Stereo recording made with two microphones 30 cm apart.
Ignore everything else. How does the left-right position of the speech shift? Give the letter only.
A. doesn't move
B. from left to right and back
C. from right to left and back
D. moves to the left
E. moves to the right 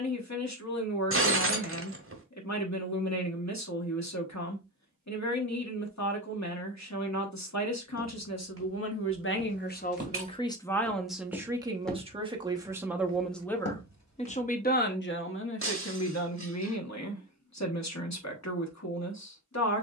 B.